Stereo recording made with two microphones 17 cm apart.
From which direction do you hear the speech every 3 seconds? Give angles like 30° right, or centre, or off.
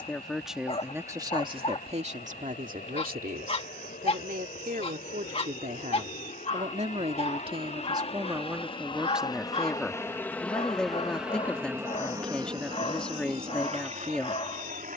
30° right, 60° right, 30° right, centre, 10° left.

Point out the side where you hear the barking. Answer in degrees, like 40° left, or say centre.
40° left.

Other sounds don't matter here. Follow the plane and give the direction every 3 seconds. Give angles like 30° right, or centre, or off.
70° left, 60° left, 50° left, 10° left, 40° right.